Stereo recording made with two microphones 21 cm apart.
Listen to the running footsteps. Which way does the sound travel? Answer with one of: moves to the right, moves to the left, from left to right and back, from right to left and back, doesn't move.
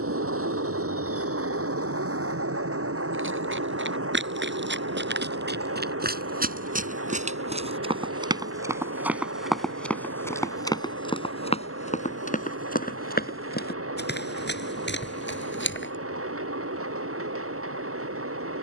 moves to the left.